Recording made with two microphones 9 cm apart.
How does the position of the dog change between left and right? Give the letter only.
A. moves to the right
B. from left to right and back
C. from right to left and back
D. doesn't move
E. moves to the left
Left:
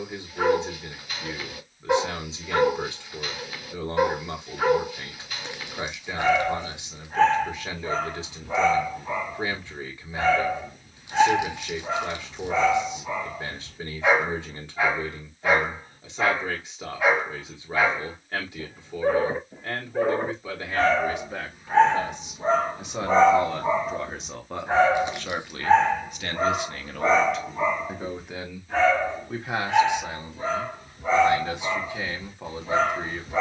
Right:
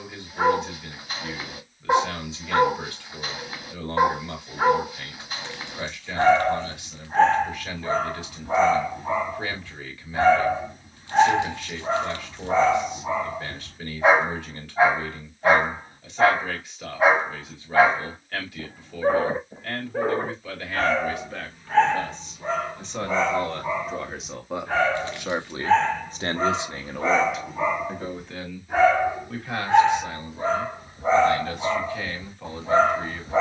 C.